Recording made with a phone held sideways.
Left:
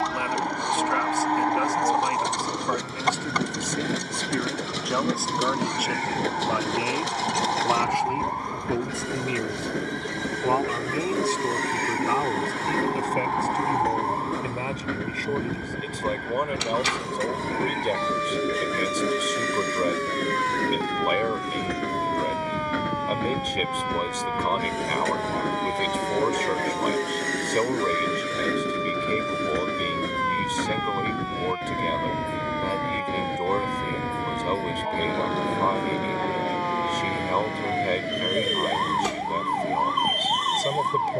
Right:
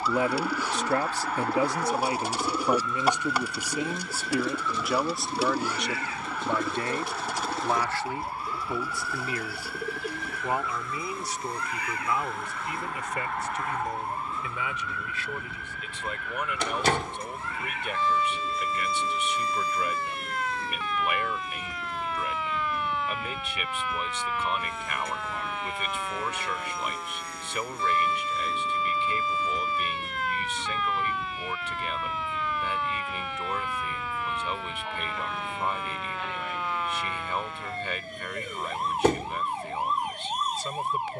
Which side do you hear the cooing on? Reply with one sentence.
You can hear the cooing in the centre.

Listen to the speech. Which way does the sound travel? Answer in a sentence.
You can hear the speech go from the right side to the left.